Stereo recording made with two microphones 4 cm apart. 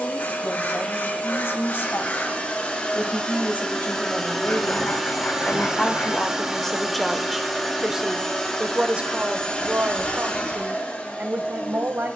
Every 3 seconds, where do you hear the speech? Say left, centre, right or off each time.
left, left, centre, right.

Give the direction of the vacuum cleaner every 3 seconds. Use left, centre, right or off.
left, centre, centre, left.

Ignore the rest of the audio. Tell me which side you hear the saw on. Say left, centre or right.
left.